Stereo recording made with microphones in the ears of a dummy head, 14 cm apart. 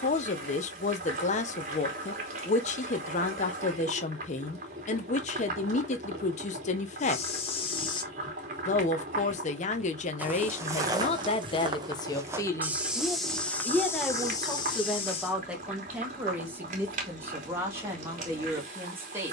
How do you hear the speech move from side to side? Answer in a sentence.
You can hear the speech move to the right.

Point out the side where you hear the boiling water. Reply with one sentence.
In this clip you hear the boiling water on the right.